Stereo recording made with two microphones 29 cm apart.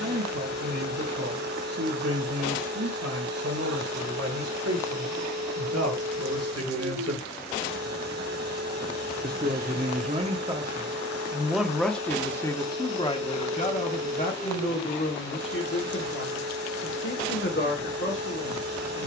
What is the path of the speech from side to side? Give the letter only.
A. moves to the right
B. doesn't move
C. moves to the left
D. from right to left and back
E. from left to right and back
C.